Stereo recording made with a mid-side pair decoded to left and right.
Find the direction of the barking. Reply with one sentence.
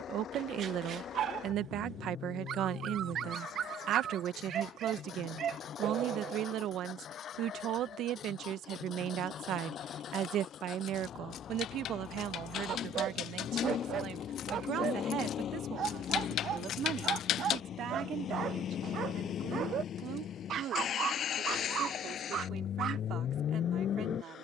You can hear the barking on the right.